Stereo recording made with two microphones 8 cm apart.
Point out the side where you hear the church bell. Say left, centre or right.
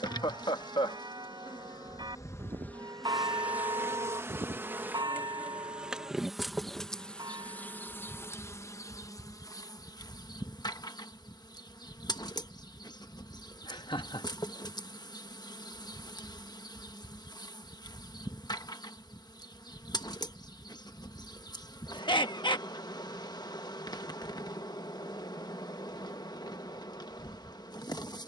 right.